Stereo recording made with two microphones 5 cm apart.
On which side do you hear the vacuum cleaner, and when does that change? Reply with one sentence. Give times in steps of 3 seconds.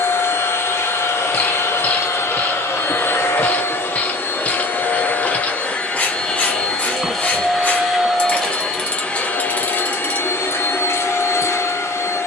You can hear the vacuum cleaner on the left from 0 s, in the centre from 6 s and on the left from 9 s.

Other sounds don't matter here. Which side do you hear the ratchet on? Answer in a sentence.
You can hear the ratchet on the left.